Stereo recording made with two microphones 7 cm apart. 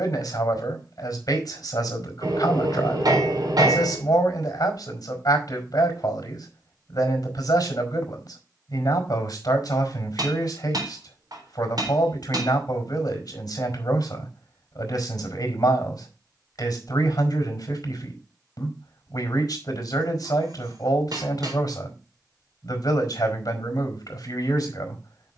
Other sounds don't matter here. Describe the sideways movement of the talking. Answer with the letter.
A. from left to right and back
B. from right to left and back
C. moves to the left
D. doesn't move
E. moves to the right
D.